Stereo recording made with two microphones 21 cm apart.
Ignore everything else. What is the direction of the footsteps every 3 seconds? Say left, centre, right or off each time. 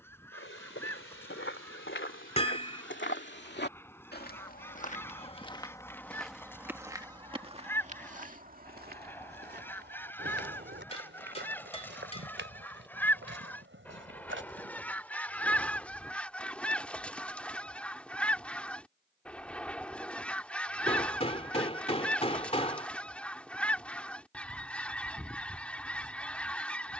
left, left, right, right, right, off, off, off, off.